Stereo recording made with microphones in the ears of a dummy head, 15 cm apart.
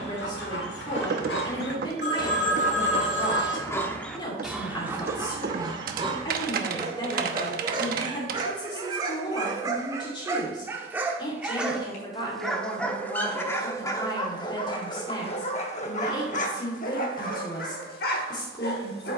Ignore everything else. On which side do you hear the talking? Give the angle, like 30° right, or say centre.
30° left.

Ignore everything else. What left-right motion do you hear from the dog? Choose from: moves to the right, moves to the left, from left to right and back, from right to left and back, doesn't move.
from left to right and back.